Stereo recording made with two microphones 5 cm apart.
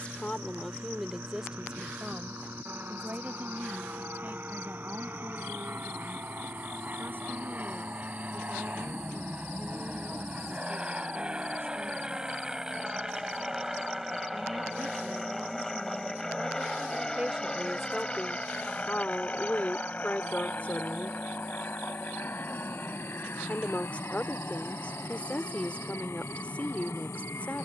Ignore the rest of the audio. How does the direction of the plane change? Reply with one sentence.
In this clip you hear the plane go from the right side to the left.